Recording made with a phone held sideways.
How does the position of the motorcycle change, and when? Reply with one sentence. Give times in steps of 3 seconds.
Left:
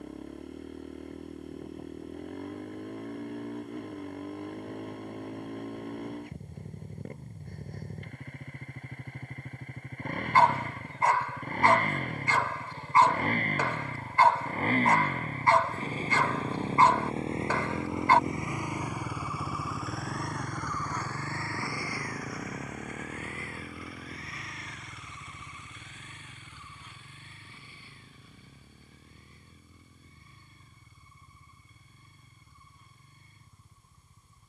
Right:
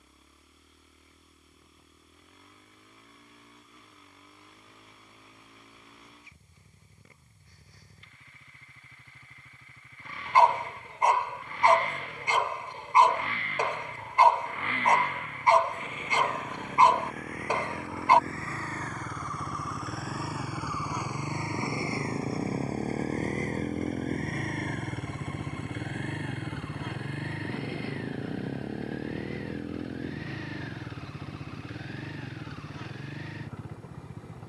In this clip you hear the motorcycle on the left from 0 s, in the centre from 18 s and on the right from 21 s.